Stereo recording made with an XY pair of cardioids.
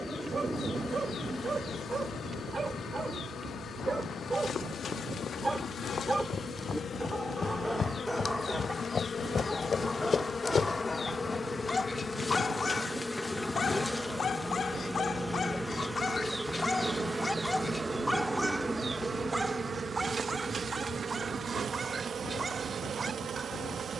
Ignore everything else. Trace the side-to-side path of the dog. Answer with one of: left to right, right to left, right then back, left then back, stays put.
left then back.